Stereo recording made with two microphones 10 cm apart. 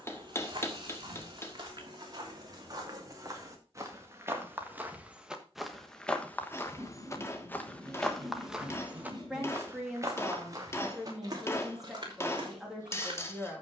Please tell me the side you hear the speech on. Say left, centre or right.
centre.